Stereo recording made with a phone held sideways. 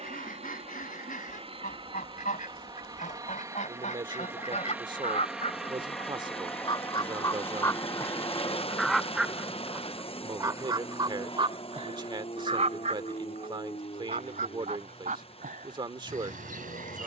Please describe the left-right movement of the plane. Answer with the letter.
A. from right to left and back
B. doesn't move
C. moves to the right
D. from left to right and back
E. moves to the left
E.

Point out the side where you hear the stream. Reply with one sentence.
In this clip you hear the stream on the left.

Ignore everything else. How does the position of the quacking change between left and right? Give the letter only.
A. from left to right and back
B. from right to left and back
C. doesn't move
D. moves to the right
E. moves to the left
D.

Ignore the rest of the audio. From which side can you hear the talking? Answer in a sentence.
In this clip you hear the talking on the right.